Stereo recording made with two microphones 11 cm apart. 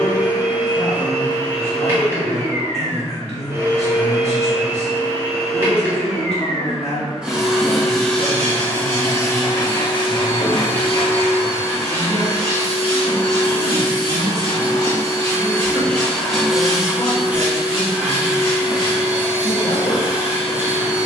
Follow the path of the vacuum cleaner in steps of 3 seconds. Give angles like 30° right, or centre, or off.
20° right, 20° right, centre, 50° left, 50° left, centre, 10° right.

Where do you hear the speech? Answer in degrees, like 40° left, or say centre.
60° left.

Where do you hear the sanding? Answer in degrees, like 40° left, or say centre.
50° left.